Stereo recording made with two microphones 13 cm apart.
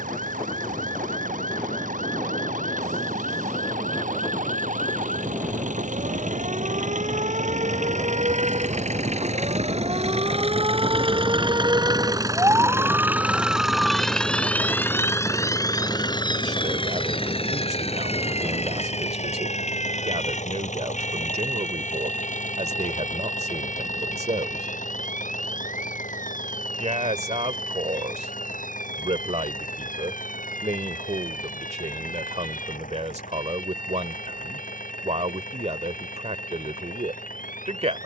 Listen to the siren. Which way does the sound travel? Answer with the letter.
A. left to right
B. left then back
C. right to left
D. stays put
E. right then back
C.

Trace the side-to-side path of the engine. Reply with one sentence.
You can hear the engine move from right to left.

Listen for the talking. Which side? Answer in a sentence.
In this clip you hear the talking on the right.